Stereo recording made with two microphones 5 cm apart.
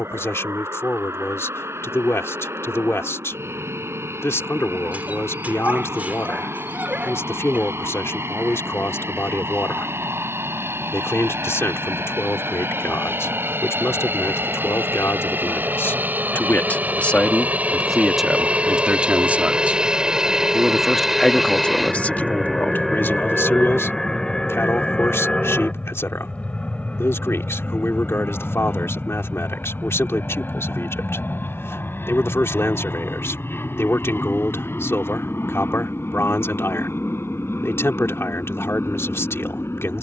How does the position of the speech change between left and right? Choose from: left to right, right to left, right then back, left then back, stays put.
right then back.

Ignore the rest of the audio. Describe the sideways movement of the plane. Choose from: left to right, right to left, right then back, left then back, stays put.
right to left.